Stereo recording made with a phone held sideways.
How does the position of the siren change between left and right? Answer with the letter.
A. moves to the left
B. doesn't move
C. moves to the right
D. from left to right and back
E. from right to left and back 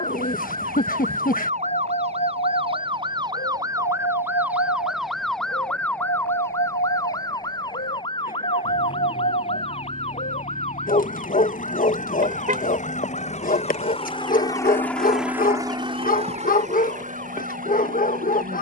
A.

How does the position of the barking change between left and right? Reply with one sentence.
In this clip you hear the barking stay in one place.